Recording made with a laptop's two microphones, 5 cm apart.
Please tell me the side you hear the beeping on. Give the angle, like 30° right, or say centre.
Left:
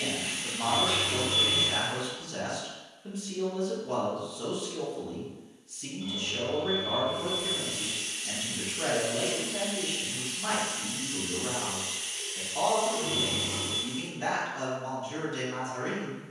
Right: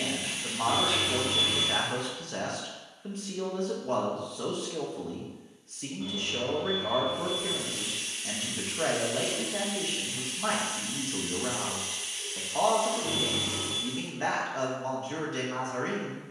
60° right.